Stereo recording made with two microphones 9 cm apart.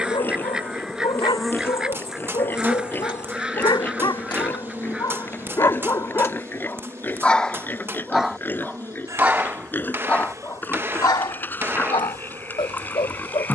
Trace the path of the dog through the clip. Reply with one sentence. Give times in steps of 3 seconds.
You can hear the dog on the left from 0 s, in the centre from 6 s and on the left from 9 s.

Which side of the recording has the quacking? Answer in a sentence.
In this clip you hear the quacking in the centre.